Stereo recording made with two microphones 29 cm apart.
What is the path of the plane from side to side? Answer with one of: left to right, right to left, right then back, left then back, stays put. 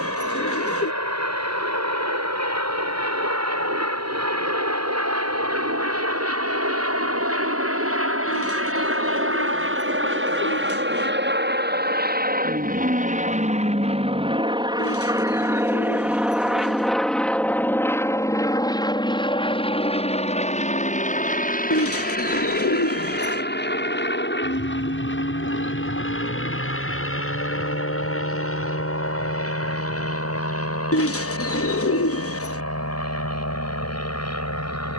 right to left.